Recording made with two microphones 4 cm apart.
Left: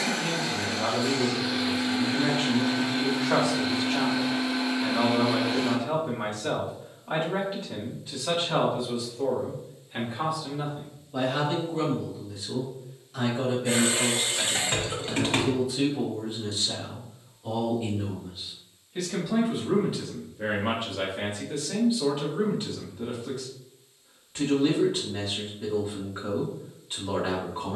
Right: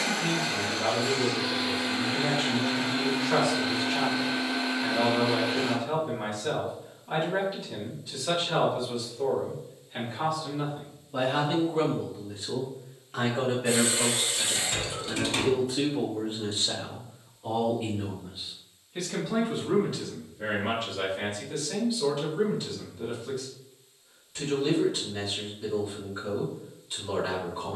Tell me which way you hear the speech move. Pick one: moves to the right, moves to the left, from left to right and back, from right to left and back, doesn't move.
from left to right and back.